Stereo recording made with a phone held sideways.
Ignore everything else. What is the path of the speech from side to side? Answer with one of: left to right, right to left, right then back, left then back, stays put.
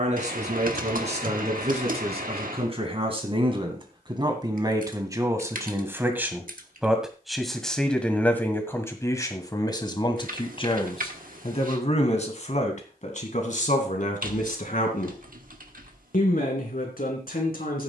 right to left.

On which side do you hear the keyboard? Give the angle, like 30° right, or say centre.
60° right.